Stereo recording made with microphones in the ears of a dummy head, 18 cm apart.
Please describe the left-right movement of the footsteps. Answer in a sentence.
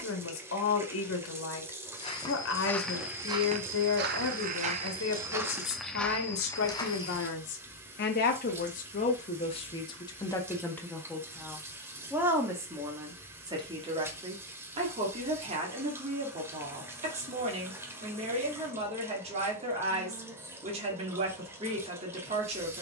You can hear the footsteps move from left to right and back again.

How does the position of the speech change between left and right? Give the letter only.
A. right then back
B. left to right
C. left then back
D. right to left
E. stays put
B.